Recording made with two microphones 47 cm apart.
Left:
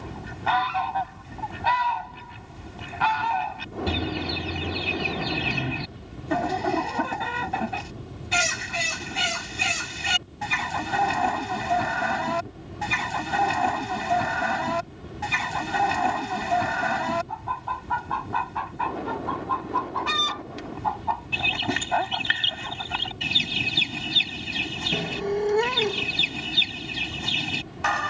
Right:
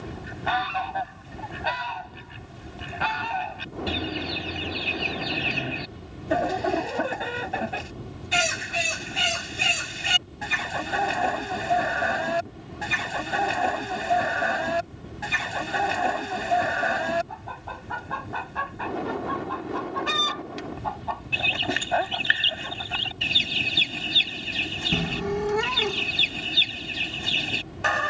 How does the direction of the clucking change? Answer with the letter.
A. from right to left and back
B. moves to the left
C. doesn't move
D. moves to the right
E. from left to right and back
C.